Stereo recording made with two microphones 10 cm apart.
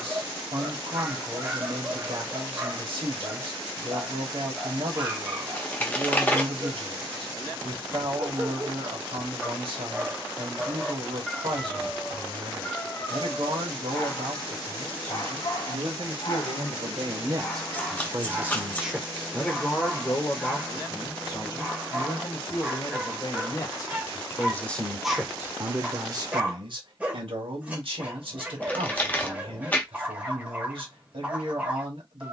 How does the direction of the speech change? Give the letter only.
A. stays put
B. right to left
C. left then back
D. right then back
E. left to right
C.